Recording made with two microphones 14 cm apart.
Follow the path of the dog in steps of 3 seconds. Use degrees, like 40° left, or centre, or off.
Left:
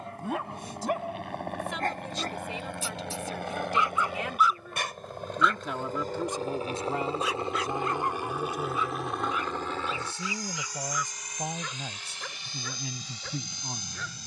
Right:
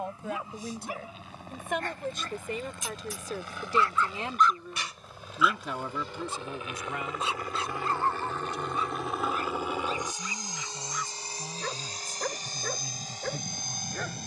50° left, 10° left, 30° right, 40° right, 50° right.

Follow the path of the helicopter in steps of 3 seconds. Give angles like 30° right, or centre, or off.
70° left, 60° left, 20° left, 20° right, 40° right.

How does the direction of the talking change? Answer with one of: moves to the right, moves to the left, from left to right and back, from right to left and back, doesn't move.
moves to the left.